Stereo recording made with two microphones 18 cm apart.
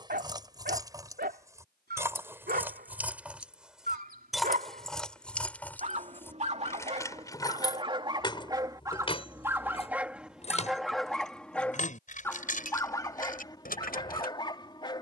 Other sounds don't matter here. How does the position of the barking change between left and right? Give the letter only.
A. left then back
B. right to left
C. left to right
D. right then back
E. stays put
B.